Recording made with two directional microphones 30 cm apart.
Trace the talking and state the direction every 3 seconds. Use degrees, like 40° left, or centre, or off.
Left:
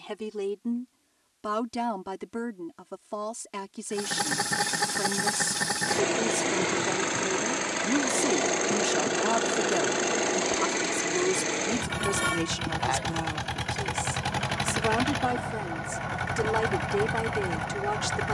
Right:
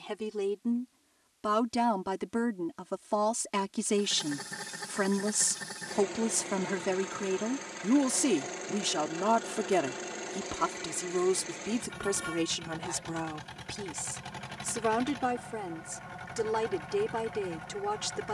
10° right, 30° right, 20° right, 10° right, centre, 10° left.